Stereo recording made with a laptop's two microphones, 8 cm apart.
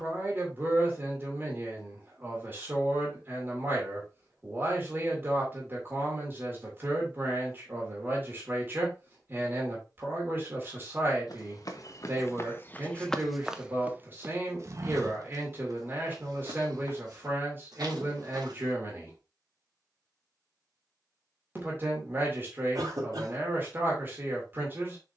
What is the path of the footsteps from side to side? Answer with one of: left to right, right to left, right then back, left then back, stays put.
left to right.